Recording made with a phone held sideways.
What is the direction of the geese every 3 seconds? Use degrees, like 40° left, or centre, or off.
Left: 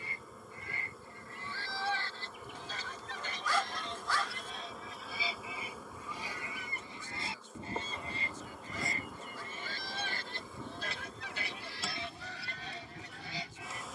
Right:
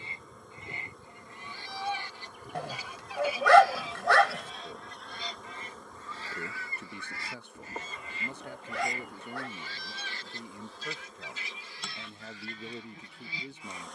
20° right, centre, 30° left, 50° left, 70° left.